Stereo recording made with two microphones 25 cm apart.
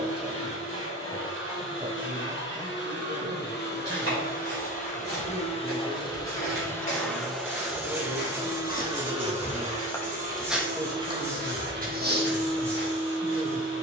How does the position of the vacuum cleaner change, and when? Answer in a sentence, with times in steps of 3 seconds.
You can hear the vacuum cleaner on the left from 0 s, in the centre from 6 s and on the right from 9 s.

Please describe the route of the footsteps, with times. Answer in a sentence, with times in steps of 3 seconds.
In this clip you hear the footsteps not at all from 0 s, on the left from 3 s, in the centre from 9 s and on the right from 12 s.